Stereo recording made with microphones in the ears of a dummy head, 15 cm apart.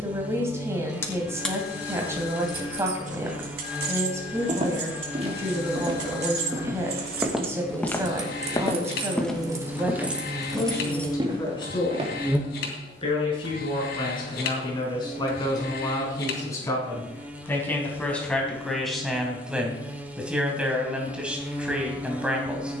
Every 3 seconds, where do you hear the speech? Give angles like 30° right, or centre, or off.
20° right, 20° right, 20° right, 10° left, 30° left, 20° left, centre, 10° right.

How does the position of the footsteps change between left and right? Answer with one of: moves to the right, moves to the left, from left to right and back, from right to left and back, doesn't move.
from right to left and back.